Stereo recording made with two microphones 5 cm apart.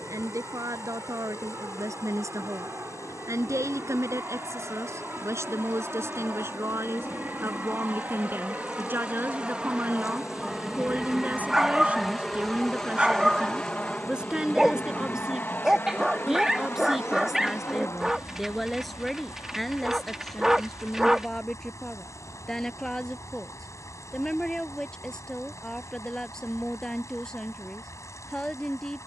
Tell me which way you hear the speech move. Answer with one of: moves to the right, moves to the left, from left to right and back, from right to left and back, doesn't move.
moves to the left.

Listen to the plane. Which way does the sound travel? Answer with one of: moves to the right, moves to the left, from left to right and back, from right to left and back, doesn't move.
moves to the left.